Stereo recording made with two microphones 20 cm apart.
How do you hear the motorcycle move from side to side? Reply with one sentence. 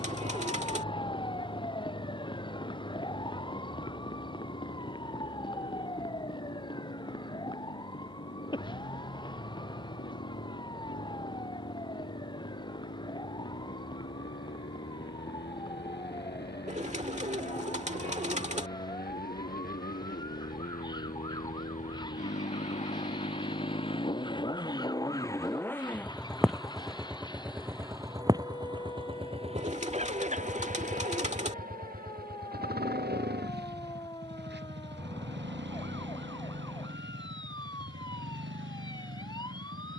You can hear the motorcycle go from the left side to the right.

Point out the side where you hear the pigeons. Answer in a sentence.
You can hear the pigeons on the right.